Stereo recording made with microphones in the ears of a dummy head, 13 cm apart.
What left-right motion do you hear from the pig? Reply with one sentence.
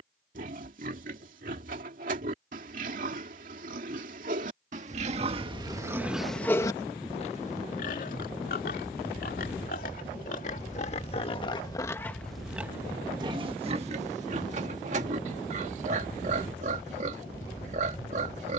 You can hear the pig go left and come back.